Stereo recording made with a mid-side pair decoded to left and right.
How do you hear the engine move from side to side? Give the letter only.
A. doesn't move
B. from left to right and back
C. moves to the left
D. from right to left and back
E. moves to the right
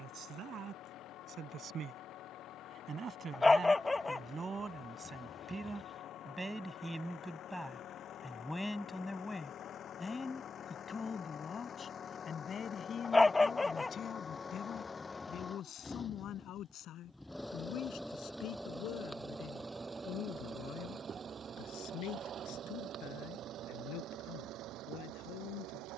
E.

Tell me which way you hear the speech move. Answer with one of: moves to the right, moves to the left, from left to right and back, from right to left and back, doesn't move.
moves to the left.